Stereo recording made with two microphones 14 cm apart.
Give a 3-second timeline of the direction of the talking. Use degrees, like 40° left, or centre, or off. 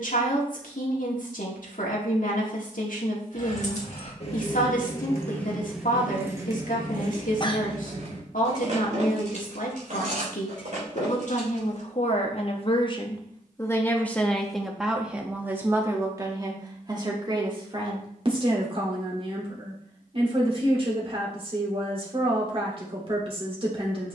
70° left, 70° left, 70° left, 60° left, 20° left, 20° right, 40° right, 40° right.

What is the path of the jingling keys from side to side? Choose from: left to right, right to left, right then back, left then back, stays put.
left to right.